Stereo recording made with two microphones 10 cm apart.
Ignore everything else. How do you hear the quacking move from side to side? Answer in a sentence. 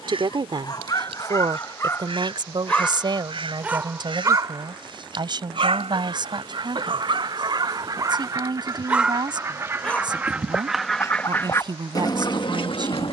You can hear the quacking move to the left.